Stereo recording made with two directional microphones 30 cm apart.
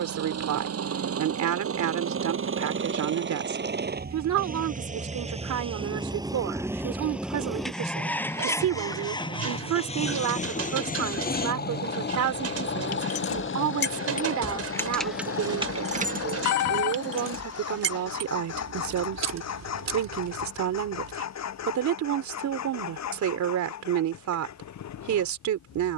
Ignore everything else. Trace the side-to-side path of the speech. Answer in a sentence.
In this clip you hear the speech stay in one place.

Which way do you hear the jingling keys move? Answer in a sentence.
In this clip you hear the jingling keys move to the right.